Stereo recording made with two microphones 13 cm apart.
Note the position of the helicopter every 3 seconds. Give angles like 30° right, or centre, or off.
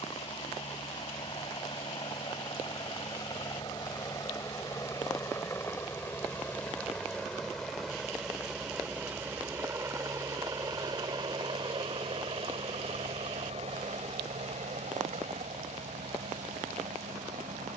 40° left, 30° left, centre, 30° right, 50° right, 70° right.